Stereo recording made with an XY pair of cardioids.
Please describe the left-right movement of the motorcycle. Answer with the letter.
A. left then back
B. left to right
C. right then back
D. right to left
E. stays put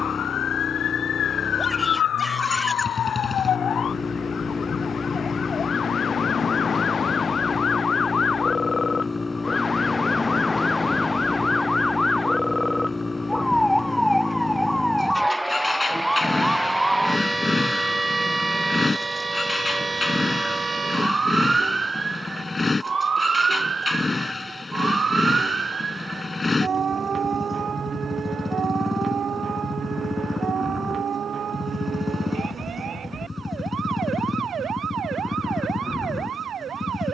E.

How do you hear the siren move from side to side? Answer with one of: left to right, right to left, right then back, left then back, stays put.
left to right.